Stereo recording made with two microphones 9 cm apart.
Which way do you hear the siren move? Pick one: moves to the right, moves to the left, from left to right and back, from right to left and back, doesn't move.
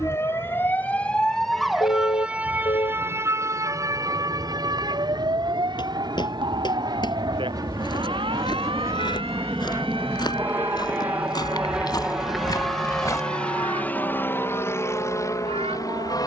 moves to the right.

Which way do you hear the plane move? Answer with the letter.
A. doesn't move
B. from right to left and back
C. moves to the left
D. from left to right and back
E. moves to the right
C.